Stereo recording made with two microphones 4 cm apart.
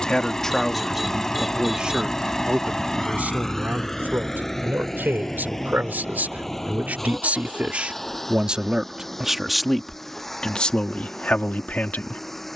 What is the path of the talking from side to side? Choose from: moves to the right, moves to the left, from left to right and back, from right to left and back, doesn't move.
from left to right and back.